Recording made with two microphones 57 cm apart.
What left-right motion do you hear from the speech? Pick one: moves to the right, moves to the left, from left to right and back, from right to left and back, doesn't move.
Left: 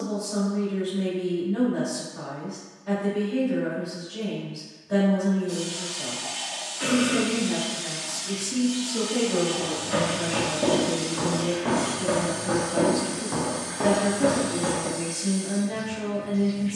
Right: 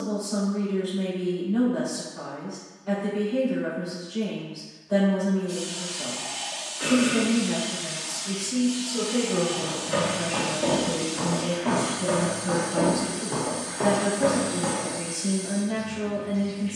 from left to right and back.